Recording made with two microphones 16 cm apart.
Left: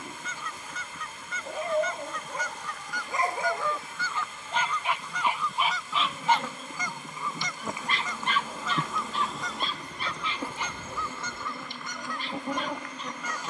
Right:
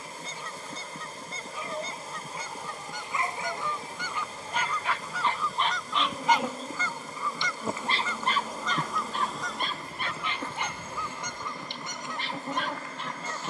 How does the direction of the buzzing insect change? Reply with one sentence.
In this clip you hear the buzzing insect go right and come back.